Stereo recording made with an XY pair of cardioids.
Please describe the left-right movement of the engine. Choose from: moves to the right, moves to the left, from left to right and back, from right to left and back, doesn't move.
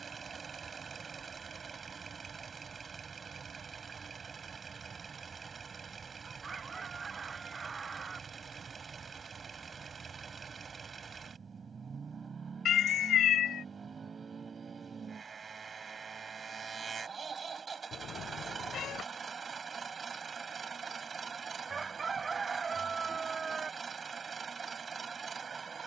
doesn't move.